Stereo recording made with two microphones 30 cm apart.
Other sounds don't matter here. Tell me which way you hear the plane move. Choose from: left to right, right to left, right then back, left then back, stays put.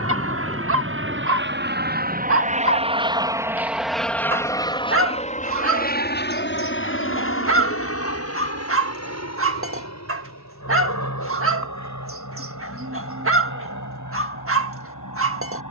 right to left.